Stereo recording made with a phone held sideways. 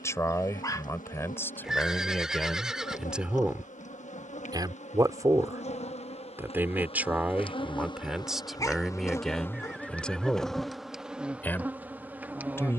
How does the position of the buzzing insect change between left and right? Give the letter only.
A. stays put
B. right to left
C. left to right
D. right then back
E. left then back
C.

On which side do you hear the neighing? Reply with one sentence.
In this clip you hear the neighing in the centre.